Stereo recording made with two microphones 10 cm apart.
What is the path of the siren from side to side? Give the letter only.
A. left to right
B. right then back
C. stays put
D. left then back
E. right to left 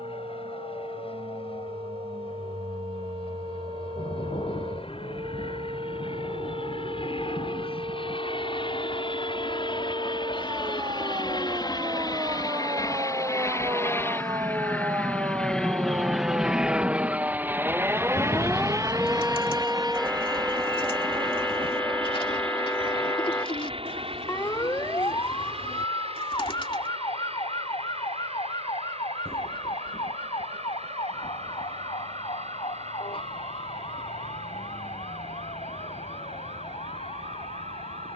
E.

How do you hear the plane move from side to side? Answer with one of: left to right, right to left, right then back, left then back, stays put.
left to right.